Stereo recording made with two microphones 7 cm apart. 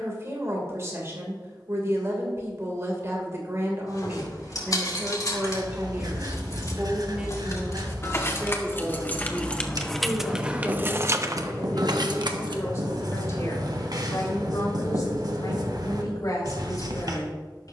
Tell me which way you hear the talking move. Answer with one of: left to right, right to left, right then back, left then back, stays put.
right to left.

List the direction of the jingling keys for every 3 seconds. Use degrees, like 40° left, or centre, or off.
off, 50° left, 40° left, 10° right, 70° right, off.